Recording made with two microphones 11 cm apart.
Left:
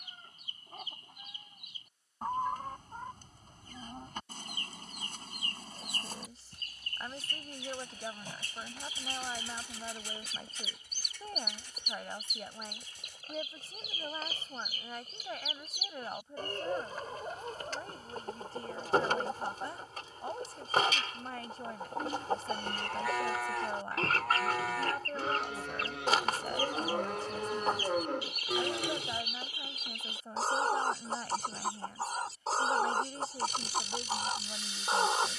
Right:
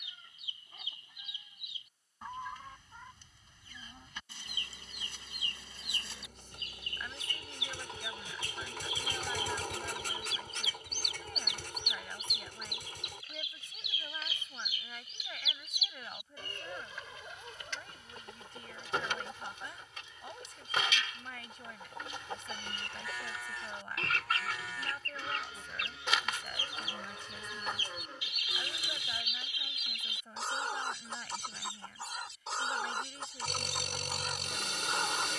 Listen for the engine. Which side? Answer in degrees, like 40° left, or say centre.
60° right.